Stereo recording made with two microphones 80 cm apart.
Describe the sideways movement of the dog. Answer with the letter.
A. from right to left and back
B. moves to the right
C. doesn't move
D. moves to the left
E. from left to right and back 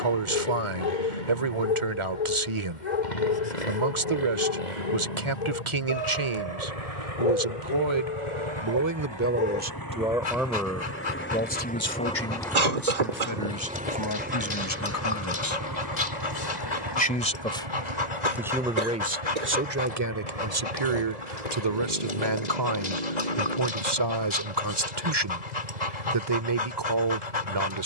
C.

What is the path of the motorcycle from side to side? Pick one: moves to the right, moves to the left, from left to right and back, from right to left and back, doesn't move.
moves to the right.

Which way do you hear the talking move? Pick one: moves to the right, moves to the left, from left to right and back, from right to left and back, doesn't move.
from right to left and back.